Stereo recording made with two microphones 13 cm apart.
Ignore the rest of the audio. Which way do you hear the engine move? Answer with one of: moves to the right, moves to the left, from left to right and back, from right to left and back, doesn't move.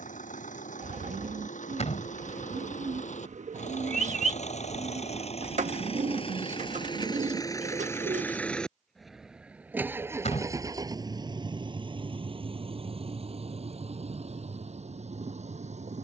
moves to the right.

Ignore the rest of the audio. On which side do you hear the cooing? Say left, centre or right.
right.